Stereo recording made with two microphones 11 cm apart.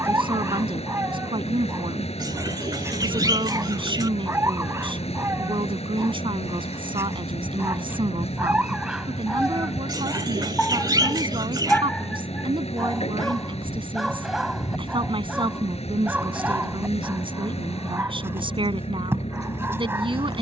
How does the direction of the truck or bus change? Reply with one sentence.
In this clip you hear the truck or bus stay put.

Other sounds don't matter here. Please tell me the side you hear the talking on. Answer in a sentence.
In this clip you hear the talking on the right.